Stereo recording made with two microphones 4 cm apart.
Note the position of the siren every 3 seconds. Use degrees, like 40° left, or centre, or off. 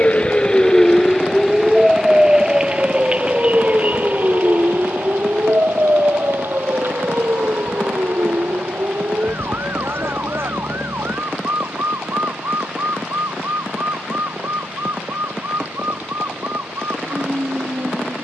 centre, 40° right, 50° right, 60° right, 60° right, 60° right.